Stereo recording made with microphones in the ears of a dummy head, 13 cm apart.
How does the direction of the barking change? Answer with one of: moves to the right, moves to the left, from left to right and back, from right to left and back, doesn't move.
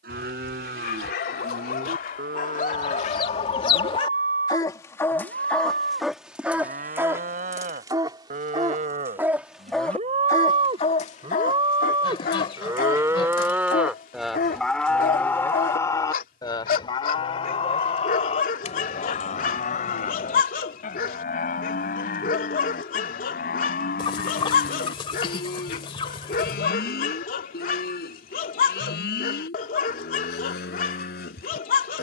from left to right and back.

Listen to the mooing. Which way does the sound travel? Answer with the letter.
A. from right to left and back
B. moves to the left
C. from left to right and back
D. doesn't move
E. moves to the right
B.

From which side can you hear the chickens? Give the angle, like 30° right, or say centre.
40° left.